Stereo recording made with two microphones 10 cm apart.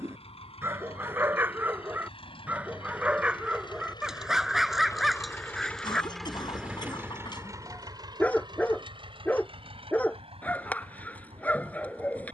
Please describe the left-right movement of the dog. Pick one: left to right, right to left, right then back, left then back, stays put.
right to left.